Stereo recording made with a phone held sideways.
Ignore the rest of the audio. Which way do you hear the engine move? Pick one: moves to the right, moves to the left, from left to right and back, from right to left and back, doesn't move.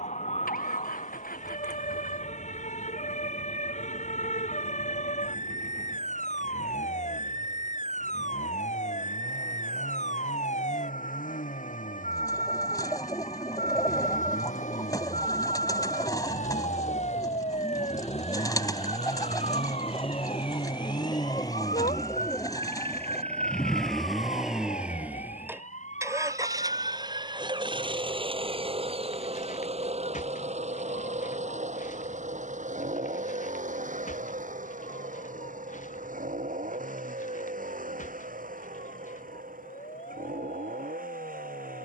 moves to the right.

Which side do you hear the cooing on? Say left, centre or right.
left.